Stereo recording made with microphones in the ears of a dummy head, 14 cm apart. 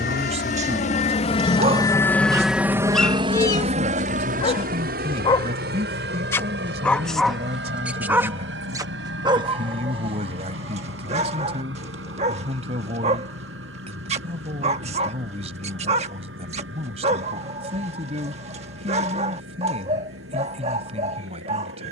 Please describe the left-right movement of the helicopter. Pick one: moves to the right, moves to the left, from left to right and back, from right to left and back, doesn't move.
moves to the right.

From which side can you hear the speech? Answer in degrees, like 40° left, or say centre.
40° right.